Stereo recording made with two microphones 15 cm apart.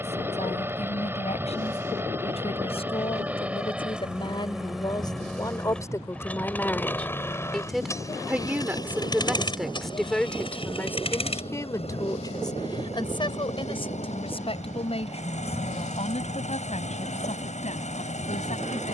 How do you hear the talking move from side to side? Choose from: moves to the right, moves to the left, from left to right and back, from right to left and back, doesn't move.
from left to right and back.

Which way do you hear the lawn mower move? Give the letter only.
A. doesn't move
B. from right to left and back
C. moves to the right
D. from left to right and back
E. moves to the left
E.